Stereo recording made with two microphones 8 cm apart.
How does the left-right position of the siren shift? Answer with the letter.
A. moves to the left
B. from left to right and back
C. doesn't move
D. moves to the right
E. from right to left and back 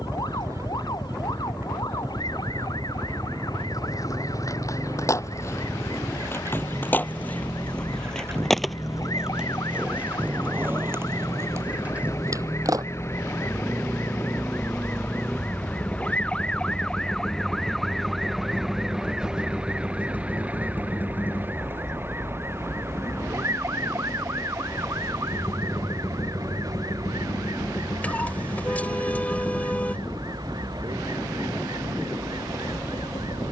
D.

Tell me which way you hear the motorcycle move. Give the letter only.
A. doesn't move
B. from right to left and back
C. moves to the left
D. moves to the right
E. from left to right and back
C.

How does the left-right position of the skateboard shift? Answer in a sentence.
In this clip you hear the skateboard travel towards the right.